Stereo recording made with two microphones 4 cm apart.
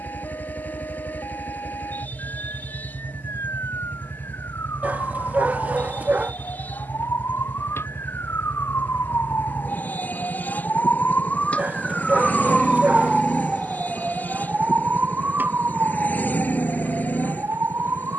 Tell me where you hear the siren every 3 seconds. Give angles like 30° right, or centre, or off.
80° left, 80° left, 70° left, 50° left, 10° right, 50° right.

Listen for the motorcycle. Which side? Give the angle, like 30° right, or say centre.
40° left.